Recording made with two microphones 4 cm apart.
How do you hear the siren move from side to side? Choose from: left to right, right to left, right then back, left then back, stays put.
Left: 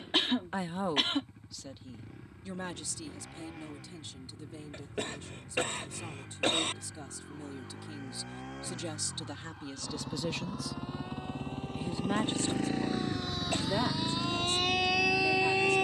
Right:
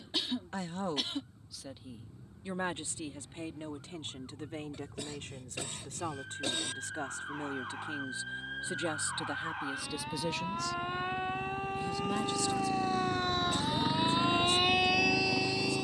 right to left.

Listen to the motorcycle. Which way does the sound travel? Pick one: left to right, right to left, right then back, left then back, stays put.
left to right.